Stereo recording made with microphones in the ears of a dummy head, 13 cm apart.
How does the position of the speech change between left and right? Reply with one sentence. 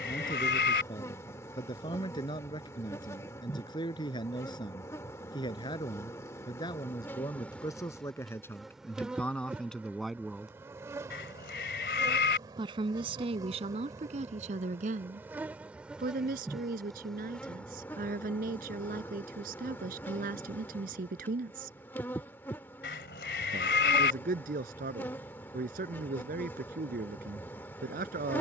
You can hear the speech go from the left side to the right.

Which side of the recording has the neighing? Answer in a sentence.
You can hear the neighing on the left.